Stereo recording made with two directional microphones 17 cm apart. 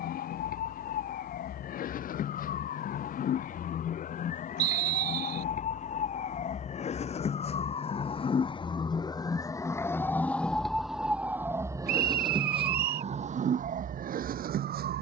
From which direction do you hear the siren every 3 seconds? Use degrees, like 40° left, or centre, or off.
60° left, 50° left, 40° left, centre, 50° right.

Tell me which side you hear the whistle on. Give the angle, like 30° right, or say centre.
70° right.